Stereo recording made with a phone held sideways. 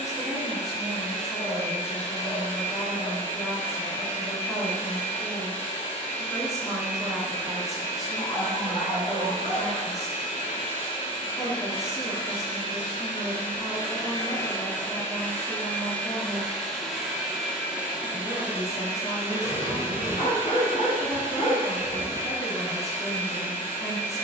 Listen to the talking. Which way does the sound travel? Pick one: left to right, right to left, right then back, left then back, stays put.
stays put.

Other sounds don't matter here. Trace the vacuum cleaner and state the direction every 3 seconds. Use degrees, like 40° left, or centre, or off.
50° left, 50° left, 50° left, 50° left, 30° left, centre, 20° right, 20° right.